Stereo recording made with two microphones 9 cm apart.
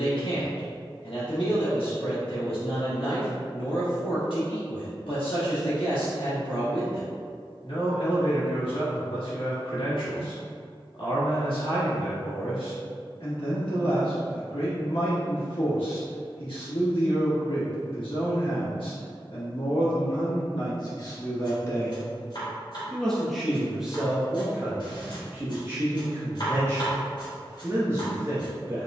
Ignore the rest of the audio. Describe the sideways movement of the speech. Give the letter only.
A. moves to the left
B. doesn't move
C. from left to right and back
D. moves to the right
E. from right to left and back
D.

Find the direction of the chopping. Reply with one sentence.
You can hear the chopping on the left.